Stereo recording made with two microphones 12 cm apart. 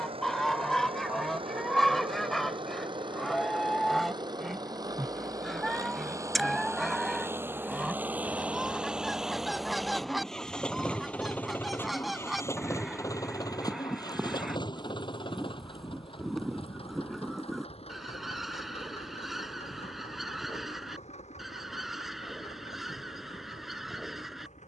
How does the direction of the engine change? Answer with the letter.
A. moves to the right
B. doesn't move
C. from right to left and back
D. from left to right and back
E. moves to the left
E.